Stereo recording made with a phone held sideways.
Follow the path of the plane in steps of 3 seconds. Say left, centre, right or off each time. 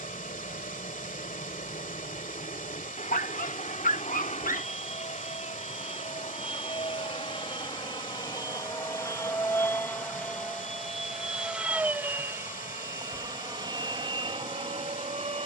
left, left, left, centre, right.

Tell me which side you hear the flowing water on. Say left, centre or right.
left.